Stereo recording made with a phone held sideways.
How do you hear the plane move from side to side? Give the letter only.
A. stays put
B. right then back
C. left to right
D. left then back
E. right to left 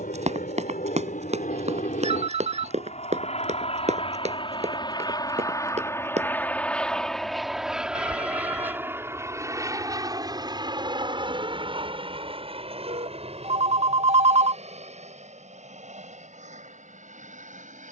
C.